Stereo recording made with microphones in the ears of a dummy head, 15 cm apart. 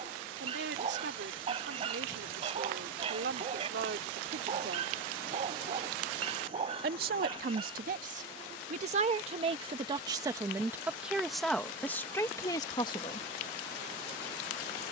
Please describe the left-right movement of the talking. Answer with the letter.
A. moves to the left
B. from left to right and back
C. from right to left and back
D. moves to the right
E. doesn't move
A.